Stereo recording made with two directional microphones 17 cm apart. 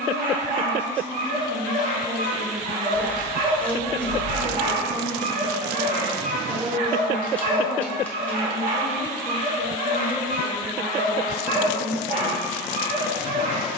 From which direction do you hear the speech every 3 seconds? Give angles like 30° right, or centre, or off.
centre, 50° right, 20° right, 10° left, 20° left.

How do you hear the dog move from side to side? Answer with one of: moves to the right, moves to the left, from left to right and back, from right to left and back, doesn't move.
doesn't move.